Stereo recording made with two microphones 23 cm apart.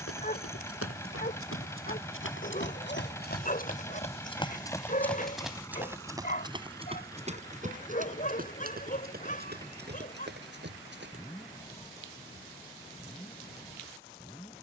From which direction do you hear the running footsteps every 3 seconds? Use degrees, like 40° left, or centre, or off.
70° left, 20° left, 30° right, 50° right, off.